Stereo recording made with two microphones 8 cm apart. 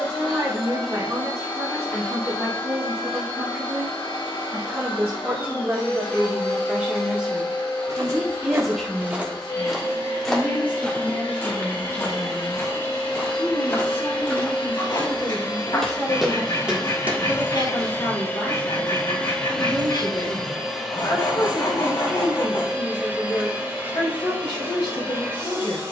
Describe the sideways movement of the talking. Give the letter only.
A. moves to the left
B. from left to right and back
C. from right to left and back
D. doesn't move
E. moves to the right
A.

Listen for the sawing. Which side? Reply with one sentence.
You can hear the sawing on the left.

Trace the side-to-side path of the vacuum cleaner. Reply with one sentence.
In this clip you hear the vacuum cleaner move to the right.